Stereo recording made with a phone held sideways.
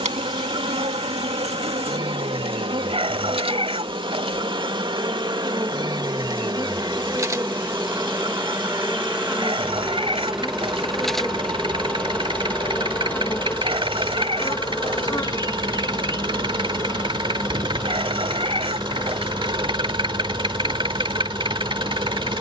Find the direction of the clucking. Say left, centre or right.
right.